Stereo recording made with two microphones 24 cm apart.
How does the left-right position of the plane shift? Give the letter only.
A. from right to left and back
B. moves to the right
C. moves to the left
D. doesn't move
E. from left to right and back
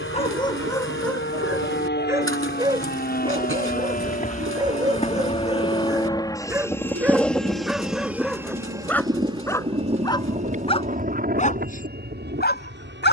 B.